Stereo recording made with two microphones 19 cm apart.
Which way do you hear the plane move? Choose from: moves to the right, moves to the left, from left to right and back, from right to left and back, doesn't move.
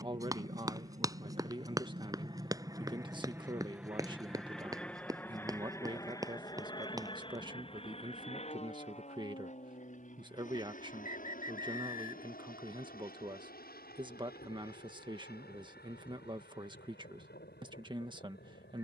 moves to the left.